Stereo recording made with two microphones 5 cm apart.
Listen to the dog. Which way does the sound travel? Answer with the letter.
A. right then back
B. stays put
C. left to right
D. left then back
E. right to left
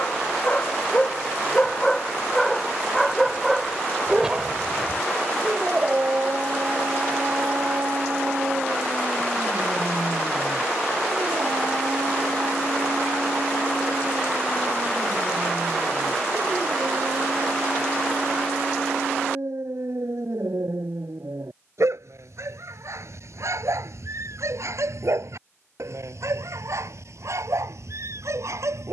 C.